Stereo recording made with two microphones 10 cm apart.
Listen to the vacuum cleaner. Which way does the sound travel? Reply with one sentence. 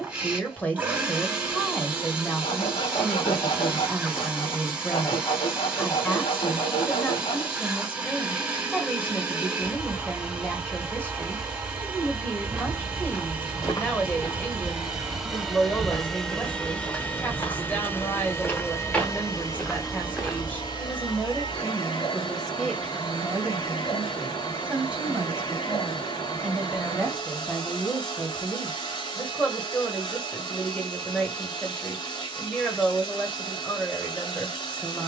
You can hear the vacuum cleaner travel towards the left.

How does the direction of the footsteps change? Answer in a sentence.
You can hear the footsteps move from right to left and back again.